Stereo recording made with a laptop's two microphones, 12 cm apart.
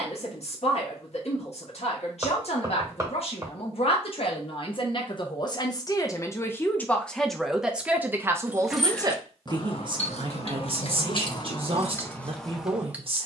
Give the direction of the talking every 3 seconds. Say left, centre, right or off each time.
left, left, centre, right, right.